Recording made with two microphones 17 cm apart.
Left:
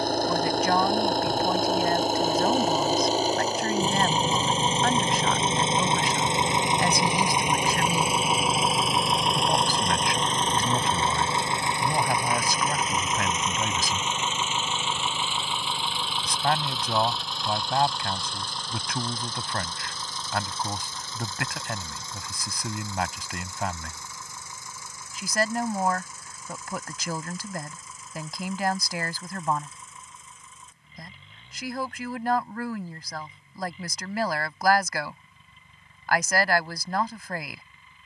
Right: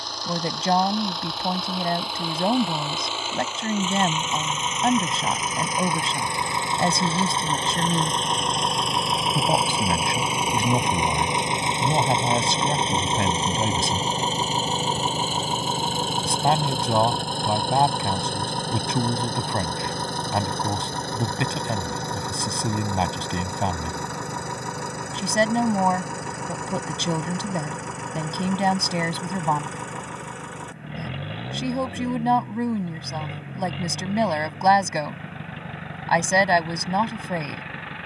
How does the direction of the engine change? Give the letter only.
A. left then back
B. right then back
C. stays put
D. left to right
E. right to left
D.